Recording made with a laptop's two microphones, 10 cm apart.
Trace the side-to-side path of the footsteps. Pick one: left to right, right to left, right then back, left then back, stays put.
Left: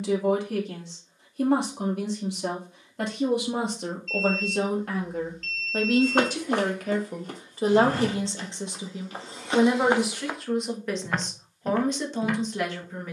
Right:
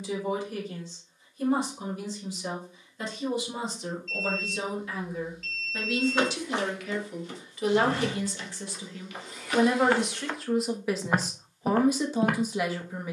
left to right.